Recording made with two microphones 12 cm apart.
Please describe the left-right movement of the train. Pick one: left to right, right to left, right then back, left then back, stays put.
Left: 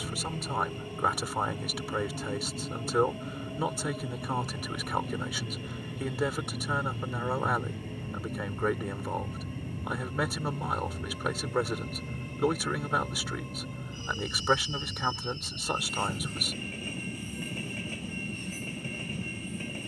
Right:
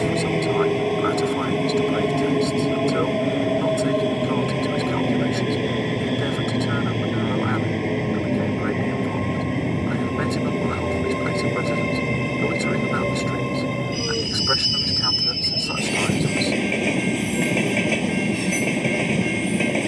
stays put.